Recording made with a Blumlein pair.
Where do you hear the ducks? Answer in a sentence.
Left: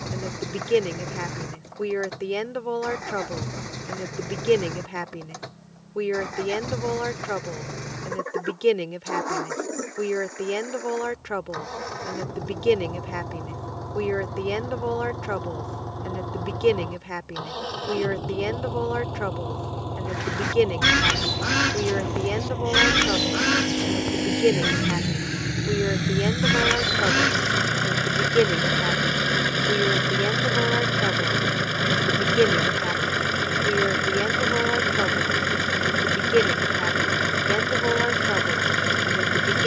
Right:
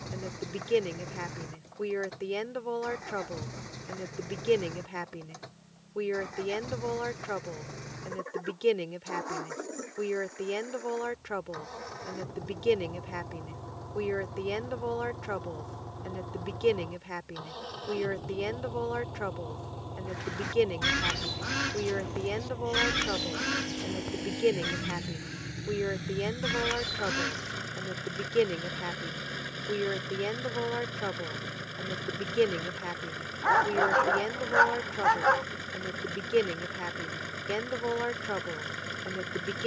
You can hear the ducks on the left.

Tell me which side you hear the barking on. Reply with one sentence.
In this clip you hear the barking on the right.